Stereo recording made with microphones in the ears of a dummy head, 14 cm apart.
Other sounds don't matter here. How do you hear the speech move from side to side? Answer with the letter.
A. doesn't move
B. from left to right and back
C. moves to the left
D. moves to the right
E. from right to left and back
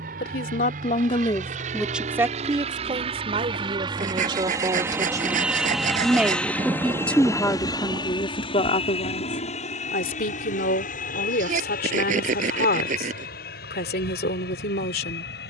B.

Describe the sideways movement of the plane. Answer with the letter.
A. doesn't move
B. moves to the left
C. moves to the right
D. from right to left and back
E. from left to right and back
B.